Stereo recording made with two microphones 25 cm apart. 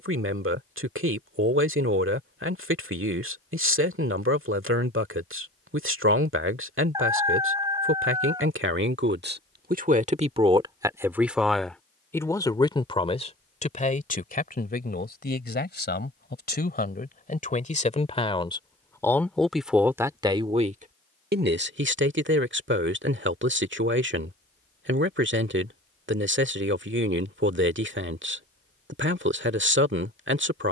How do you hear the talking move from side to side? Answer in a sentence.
You can hear the talking move from right to left and back again.